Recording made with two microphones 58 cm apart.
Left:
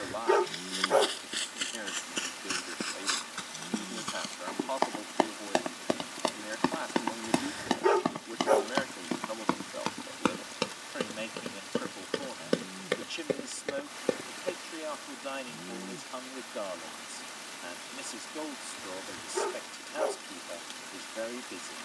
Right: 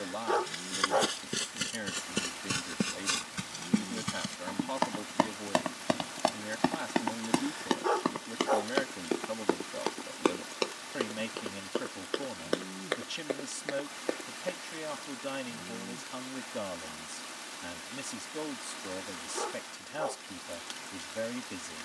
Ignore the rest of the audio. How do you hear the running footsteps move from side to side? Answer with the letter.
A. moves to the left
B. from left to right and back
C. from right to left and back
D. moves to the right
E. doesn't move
A.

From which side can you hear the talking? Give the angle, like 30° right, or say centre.
50° right.